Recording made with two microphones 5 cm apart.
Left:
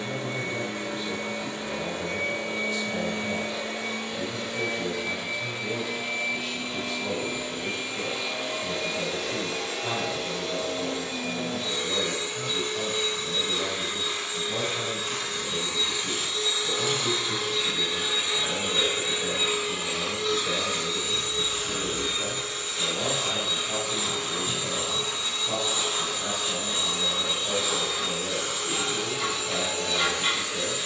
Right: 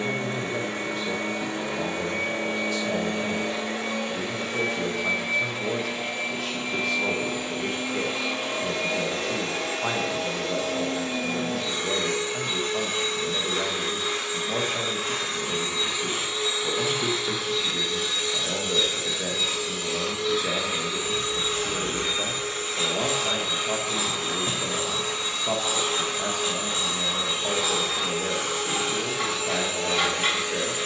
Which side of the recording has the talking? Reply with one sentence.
You can hear the talking on the right.